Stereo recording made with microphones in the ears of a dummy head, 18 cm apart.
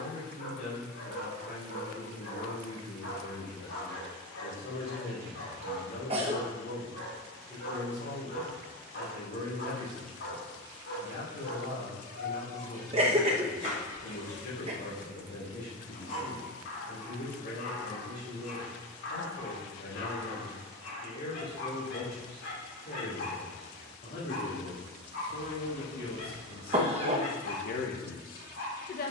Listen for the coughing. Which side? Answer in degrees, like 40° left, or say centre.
30° right.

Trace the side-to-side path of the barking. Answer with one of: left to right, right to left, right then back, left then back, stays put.
stays put.